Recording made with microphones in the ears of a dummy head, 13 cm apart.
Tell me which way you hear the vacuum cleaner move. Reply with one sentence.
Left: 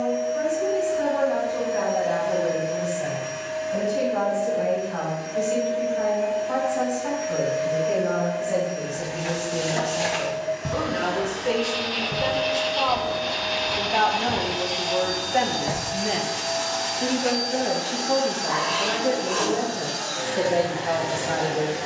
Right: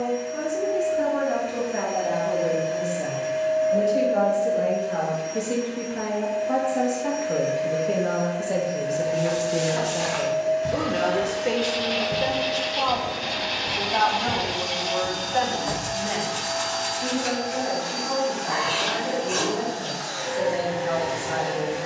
In this clip you hear the vacuum cleaner go from the right side to the left.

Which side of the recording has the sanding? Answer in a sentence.
You can hear the sanding on the right.